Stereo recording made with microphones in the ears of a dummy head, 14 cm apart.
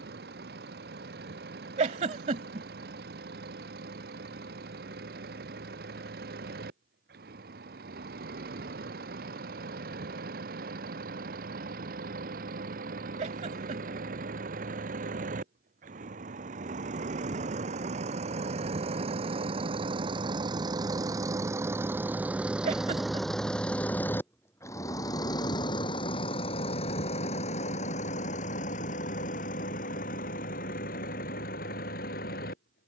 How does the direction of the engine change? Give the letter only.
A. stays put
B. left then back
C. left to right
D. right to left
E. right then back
D.